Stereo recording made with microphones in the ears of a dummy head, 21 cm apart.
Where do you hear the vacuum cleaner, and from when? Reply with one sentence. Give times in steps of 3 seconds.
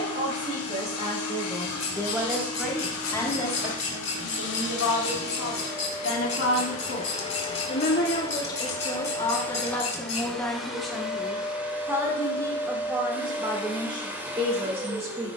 In this clip you hear the vacuum cleaner on the left from 0 s and in the centre from 9 s.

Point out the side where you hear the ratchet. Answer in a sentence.
You can hear the ratchet on the left.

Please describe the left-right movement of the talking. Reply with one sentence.
You can hear the talking move from right to left and back again.